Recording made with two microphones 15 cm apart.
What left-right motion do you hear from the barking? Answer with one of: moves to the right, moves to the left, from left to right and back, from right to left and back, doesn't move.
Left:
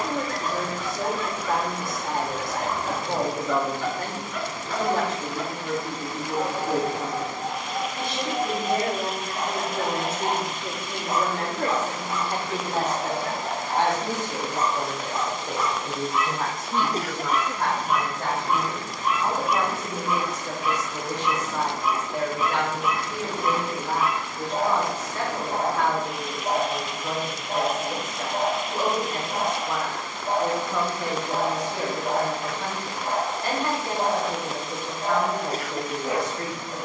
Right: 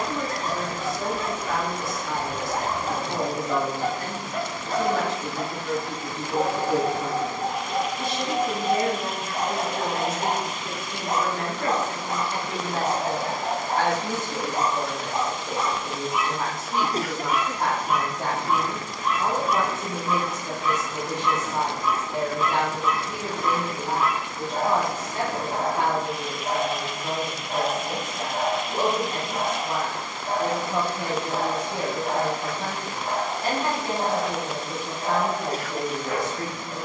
moves to the left.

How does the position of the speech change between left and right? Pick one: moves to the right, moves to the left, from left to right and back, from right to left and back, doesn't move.
moves to the right.